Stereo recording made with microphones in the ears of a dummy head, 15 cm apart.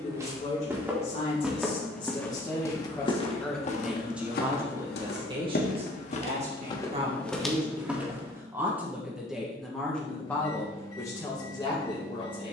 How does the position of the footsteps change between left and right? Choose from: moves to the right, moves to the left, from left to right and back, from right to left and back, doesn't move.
from right to left and back.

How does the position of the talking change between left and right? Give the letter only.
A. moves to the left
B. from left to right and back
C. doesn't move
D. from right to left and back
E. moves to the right
B.